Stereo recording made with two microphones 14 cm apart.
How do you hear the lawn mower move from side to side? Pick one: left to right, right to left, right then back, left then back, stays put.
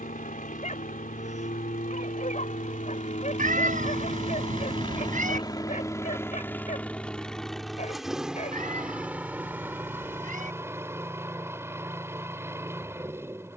left to right.